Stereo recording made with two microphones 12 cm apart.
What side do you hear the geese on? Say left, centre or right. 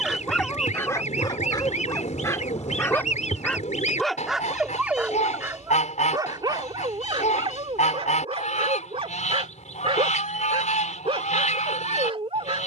left.